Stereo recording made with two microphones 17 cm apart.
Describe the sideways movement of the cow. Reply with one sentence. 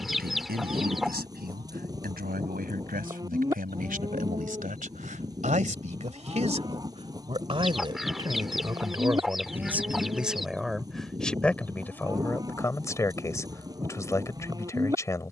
In this clip you hear the cow stay in one place.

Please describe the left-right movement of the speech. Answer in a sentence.
In this clip you hear the speech go from the right side to the left.